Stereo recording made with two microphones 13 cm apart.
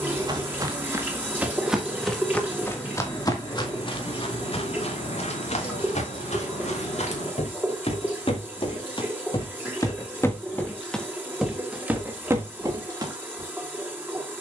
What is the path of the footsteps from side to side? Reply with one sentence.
In this clip you hear the footsteps move from right to left and back again.